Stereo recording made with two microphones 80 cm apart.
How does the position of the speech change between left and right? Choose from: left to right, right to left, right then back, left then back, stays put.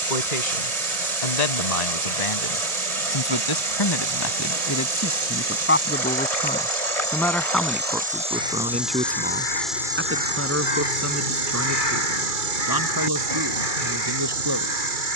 left to right.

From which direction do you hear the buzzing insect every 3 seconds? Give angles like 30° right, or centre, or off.
60° right, 50° right, 20° right, 20° right, 60° right.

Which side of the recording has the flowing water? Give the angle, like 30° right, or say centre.
40° right.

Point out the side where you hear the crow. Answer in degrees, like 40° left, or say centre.
80° left.